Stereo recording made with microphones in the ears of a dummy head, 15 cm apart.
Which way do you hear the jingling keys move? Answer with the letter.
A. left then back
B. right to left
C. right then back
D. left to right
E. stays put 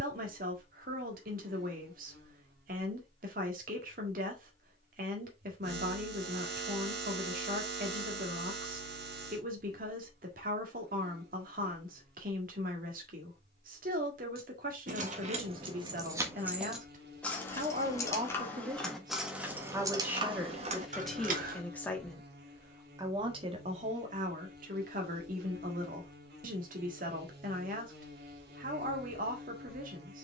A.